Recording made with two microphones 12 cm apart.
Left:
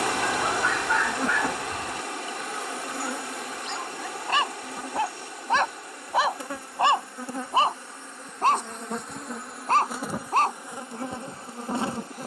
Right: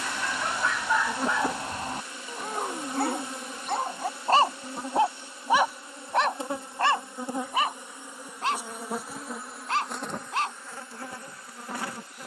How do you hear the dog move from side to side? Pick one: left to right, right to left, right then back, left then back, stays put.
right then back.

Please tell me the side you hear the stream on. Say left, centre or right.
left.